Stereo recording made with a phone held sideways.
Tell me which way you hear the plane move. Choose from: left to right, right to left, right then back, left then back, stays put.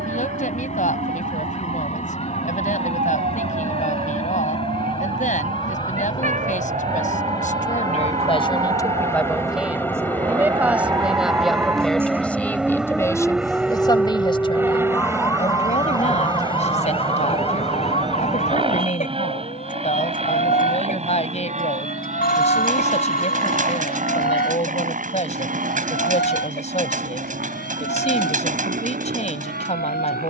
left to right.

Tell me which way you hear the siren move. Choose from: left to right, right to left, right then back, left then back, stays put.
right to left.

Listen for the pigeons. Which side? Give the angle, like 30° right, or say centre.
50° right.